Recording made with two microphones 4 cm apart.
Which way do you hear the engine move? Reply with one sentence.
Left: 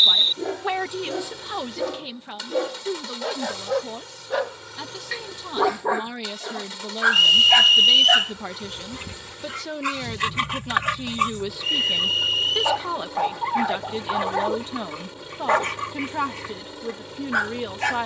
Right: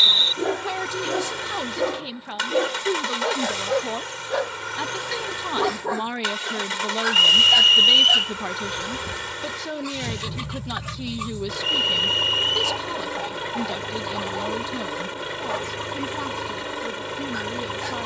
In this clip you hear the engine stay put.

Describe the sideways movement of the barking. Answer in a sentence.
In this clip you hear the barking move from right to left.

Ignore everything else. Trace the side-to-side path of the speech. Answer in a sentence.
In this clip you hear the speech move from left to right and back again.